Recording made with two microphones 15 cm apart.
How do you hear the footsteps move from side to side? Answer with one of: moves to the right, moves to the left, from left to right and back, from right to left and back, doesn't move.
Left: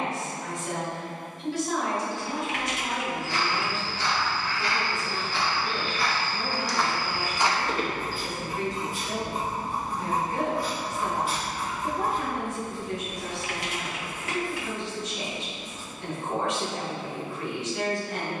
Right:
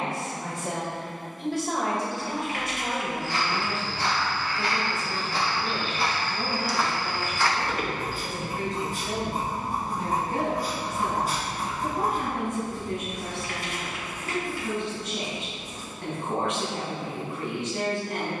moves to the left.